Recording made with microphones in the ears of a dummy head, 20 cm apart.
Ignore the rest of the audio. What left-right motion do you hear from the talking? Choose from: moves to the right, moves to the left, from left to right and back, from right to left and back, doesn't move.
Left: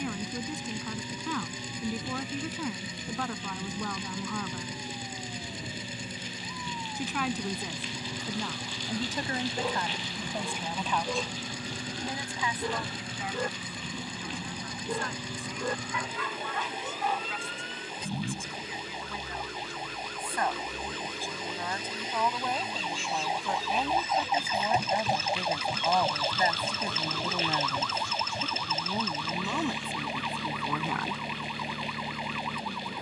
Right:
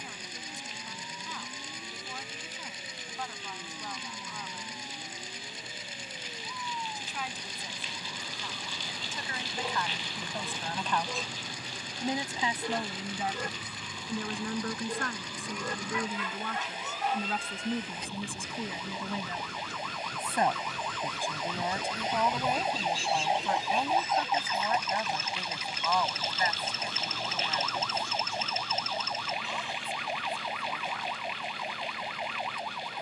from left to right and back.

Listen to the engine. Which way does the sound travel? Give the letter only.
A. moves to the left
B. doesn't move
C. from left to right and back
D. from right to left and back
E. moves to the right
B.